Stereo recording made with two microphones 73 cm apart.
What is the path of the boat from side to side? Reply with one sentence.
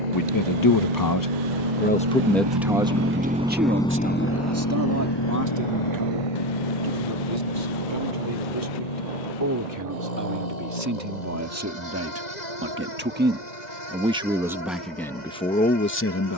You can hear the boat go from the right side to the left.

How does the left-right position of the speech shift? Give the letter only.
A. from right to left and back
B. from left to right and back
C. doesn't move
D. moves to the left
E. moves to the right
B.